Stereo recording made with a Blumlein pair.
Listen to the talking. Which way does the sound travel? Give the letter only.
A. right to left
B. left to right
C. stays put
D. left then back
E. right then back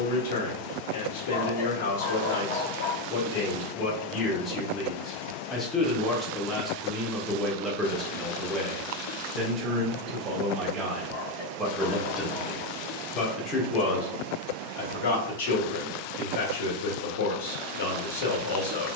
E.